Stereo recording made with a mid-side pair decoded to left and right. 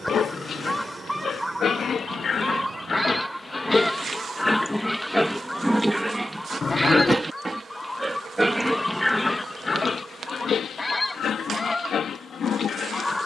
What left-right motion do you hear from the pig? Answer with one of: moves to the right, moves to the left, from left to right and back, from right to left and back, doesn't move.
from left to right and back.